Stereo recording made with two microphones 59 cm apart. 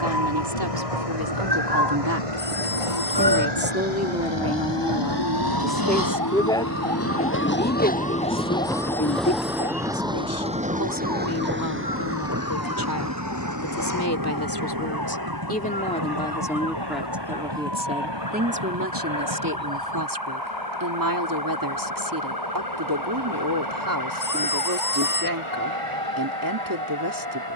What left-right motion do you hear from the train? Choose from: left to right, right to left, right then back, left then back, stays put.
left to right.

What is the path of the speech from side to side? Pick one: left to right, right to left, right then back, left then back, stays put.
left then back.